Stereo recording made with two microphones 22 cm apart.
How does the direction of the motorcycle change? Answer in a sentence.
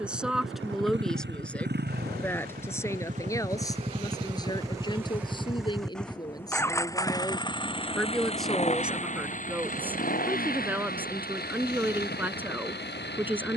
In this clip you hear the motorcycle travel towards the left.